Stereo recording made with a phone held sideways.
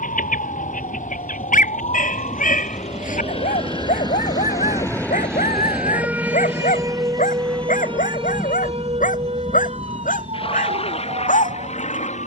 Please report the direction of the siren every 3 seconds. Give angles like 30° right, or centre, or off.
70° left, 20° left, 30° right, 50° right.